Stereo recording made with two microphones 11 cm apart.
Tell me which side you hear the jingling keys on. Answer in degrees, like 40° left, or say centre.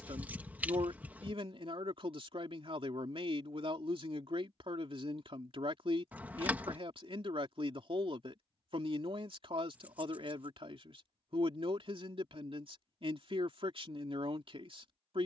20° right.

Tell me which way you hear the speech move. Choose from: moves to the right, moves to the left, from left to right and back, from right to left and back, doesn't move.
doesn't move.